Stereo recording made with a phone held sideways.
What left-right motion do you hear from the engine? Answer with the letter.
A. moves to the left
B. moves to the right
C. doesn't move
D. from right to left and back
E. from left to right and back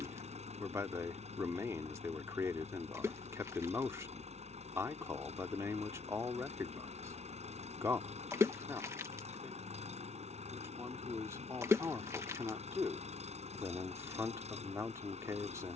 C.